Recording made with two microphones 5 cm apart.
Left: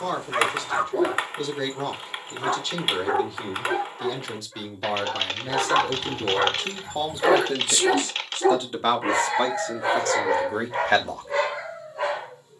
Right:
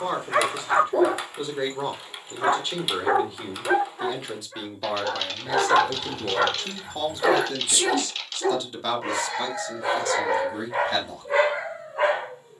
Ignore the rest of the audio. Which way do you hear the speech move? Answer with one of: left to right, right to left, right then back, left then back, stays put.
right to left.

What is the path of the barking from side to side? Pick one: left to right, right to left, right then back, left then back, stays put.
left then back.